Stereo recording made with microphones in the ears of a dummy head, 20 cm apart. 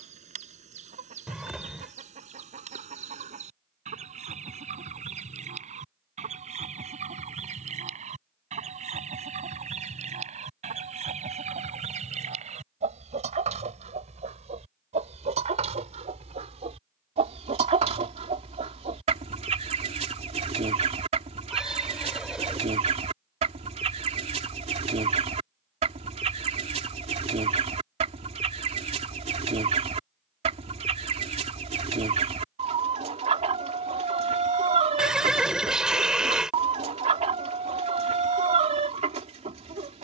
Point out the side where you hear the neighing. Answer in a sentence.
You can hear the neighing in the centre.